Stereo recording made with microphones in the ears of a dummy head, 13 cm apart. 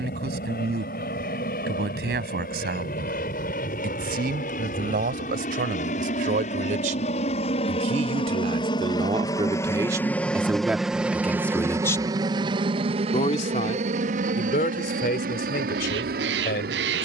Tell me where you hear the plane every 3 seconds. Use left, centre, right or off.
left, left, left, centre, right, right.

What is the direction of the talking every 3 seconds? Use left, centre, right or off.
right, right, right, centre, left, left.